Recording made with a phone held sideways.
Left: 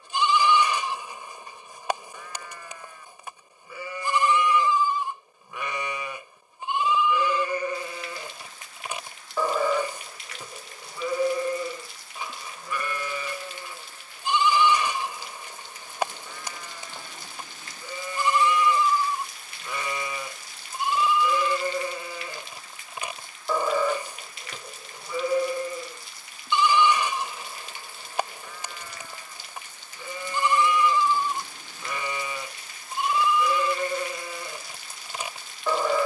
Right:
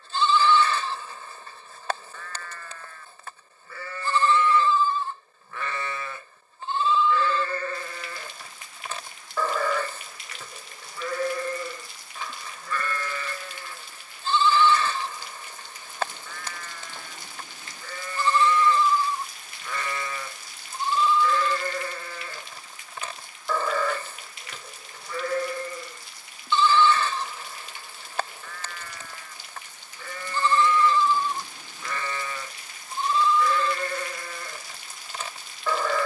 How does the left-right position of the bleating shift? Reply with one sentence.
You can hear the bleating stay in one place.